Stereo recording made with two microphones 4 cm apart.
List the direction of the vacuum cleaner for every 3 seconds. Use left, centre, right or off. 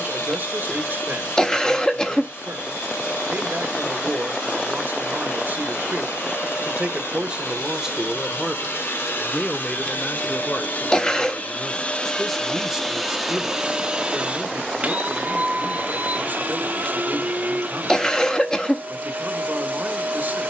left, left, left, left, centre, right, right.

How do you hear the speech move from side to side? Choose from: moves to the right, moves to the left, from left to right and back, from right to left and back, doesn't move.
from right to left and back.